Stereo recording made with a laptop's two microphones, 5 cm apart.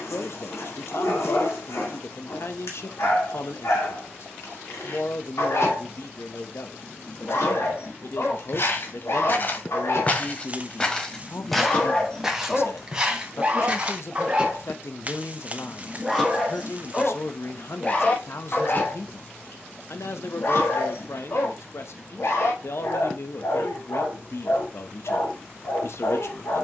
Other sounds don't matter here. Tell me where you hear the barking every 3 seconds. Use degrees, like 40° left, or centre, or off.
70° left, 70° left, 70° left, 60° left, 10° right, 10° left, 50° left, 70° left, 70° left.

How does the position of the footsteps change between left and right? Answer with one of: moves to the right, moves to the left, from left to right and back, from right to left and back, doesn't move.
moves to the right.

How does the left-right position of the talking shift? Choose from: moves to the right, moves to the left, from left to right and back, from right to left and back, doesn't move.
doesn't move.